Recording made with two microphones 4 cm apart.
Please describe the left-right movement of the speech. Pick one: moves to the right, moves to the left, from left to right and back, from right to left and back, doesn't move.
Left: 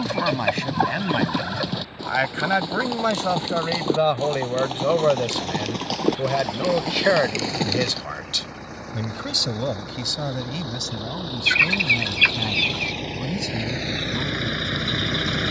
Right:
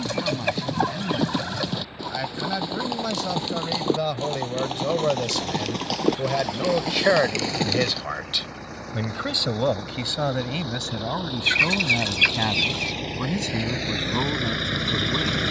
moves to the right.